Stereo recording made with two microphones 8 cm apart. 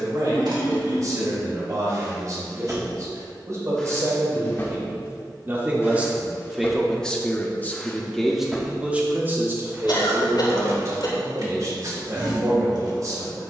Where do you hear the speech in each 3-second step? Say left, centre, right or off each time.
right, right, centre, right, right.